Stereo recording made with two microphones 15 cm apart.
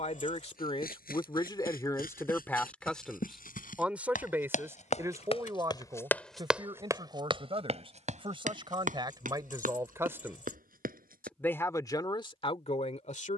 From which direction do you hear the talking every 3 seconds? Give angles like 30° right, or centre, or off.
30° left, 10° right, 30° right, 10° right, 40° left.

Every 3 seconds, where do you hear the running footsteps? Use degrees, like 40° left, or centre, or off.
80° left, 60° left, 30° right, 70° right, off.